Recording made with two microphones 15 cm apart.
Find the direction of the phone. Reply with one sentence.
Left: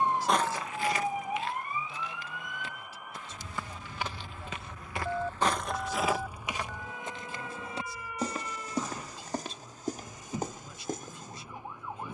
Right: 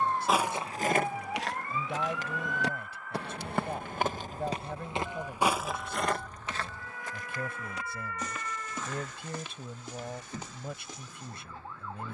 You can hear the phone on the left.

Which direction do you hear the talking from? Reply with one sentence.
You can hear the talking on the right.